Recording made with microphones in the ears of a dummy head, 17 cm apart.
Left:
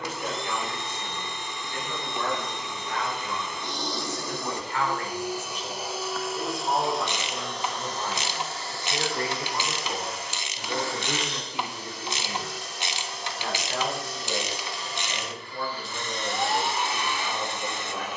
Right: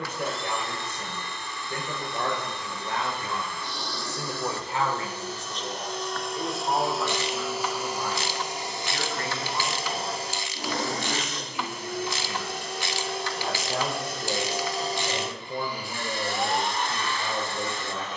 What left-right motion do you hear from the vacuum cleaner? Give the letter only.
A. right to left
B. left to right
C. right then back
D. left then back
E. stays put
C.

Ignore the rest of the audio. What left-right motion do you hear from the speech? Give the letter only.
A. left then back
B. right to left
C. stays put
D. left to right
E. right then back
A.